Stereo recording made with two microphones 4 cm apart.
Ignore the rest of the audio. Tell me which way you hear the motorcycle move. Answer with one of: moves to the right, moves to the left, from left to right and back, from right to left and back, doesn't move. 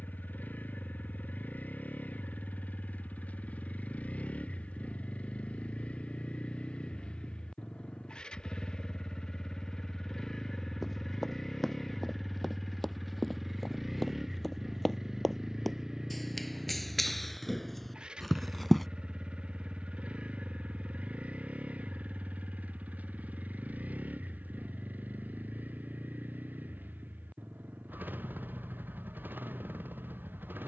moves to the right.